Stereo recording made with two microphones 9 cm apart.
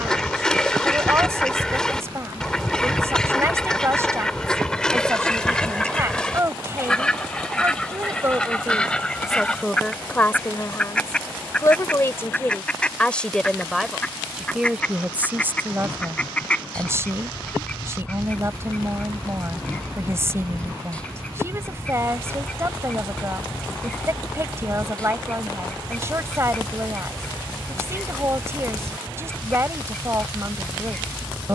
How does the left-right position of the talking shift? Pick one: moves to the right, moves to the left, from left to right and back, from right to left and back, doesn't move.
from right to left and back.